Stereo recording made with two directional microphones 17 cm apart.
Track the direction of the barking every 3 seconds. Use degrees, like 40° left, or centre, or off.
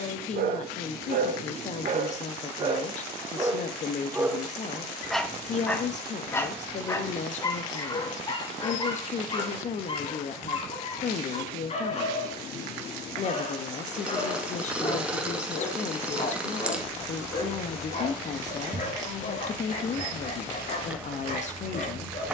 50° right, centre, 20° left, 30° left, 40° left, 50° left, 50° left, 50° left.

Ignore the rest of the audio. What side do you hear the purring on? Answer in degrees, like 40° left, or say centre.
10° right.